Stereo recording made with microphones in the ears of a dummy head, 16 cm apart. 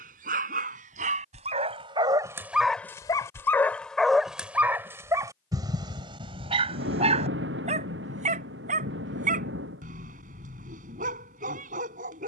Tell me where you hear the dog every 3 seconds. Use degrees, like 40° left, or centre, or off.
30° right, centre, 40° right, 50° right.